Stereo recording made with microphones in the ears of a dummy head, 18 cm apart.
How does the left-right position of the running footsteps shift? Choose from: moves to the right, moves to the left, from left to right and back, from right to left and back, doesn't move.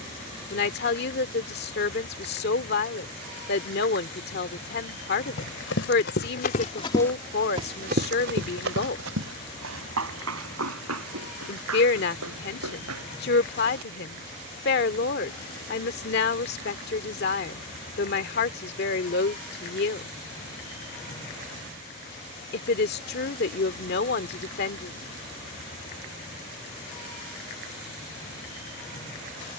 moves to the right.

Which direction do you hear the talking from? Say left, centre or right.
left.